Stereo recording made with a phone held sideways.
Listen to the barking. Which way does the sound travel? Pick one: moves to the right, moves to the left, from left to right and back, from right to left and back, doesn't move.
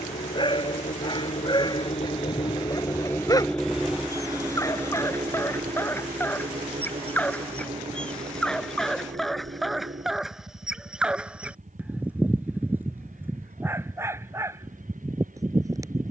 moves to the right.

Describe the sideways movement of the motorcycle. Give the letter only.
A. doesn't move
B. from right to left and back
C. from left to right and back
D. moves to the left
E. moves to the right
E.